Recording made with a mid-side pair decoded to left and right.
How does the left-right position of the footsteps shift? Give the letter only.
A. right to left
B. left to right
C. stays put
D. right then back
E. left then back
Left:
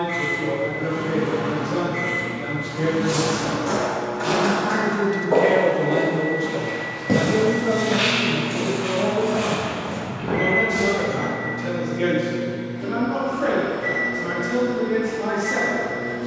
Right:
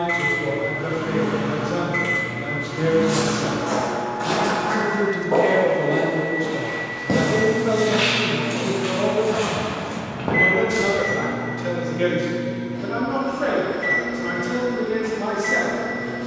B.